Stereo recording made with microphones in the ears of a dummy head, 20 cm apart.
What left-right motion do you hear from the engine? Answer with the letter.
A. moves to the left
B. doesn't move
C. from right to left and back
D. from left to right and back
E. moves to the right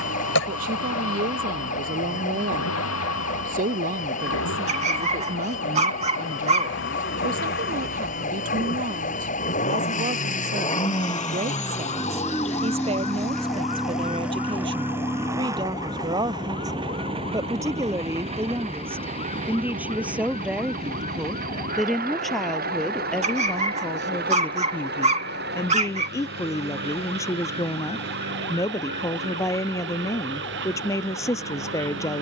E.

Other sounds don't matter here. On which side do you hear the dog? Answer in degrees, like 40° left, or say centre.
30° right.